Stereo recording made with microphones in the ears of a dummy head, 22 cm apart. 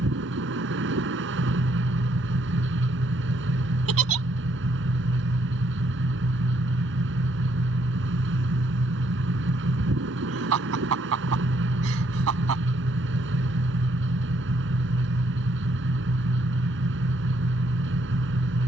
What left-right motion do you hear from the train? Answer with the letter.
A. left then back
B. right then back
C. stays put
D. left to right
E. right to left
C.